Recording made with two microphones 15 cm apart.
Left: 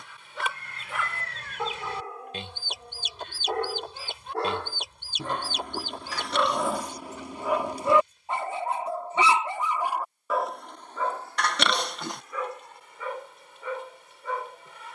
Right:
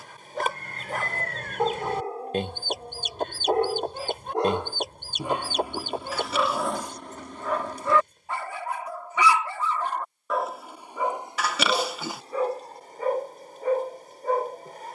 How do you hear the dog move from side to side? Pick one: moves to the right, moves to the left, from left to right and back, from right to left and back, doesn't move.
from right to left and back.